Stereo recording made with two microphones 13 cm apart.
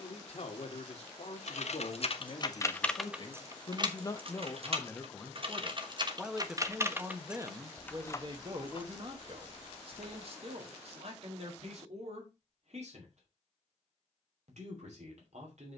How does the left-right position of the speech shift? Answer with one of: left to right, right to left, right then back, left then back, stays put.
left to right.